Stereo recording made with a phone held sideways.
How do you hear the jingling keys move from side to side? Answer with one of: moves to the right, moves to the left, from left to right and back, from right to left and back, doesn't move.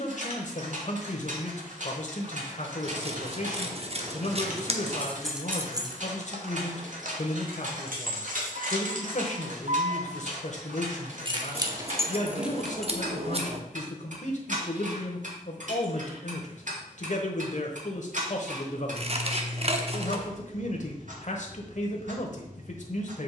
from left to right and back.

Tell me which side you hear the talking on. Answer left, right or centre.
left.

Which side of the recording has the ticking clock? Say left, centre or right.
right.